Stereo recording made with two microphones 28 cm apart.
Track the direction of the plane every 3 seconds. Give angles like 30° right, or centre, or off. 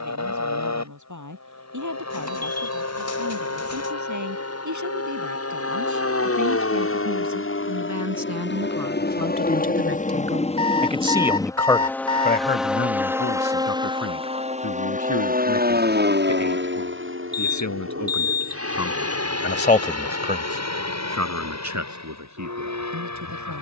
70° left, 60° left, 50° left, 20° left, 10° right, 40° right, 50° right, 60° right.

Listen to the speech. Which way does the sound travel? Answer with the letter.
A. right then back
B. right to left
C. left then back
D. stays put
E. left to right
C.